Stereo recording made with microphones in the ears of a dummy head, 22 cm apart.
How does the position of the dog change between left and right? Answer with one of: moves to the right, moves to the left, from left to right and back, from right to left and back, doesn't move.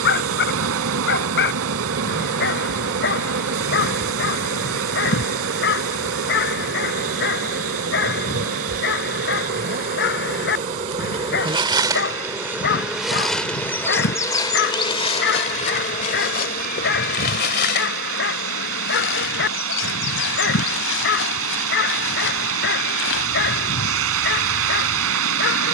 doesn't move.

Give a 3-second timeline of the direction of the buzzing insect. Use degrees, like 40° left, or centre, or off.
50° right, 50° right, 50° right, 30° right, centre, 40° left, 50° left, 60° left, 60° left.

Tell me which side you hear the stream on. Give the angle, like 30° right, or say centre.
70° right.